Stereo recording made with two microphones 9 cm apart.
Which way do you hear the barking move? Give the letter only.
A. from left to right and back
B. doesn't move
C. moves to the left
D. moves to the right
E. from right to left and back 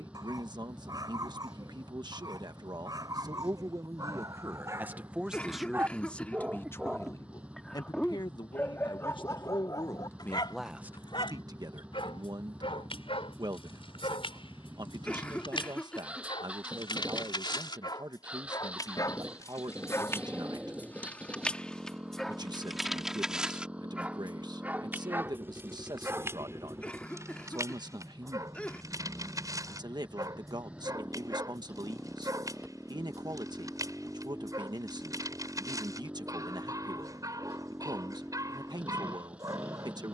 E.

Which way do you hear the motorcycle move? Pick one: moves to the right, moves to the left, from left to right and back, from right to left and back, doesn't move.
doesn't move.